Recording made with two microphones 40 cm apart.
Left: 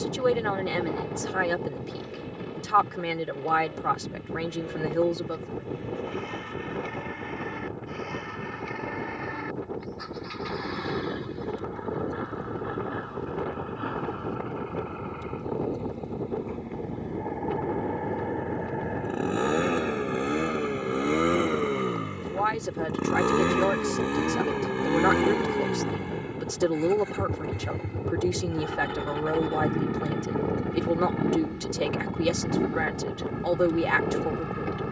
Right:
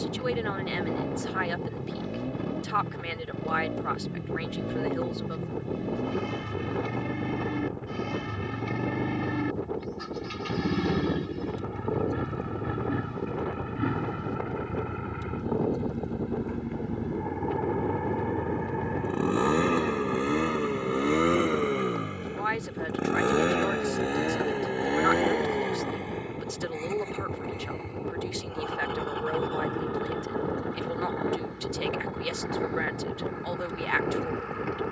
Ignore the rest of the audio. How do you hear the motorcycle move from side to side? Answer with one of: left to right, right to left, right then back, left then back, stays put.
right to left.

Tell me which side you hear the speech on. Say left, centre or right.
left.